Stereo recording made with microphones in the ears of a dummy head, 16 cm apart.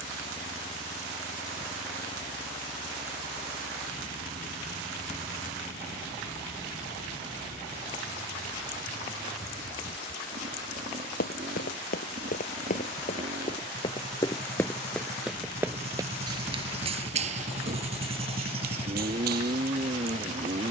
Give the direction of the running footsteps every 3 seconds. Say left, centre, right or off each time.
off, off, off, left, left, right, right.